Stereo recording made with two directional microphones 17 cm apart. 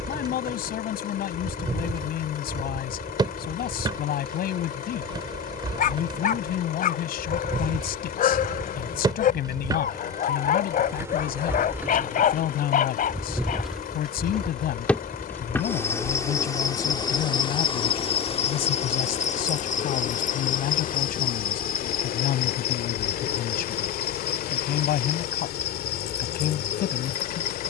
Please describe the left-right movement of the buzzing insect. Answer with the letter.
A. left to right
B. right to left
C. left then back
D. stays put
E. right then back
B.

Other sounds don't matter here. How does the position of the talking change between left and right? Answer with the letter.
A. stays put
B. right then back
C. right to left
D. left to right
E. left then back
A.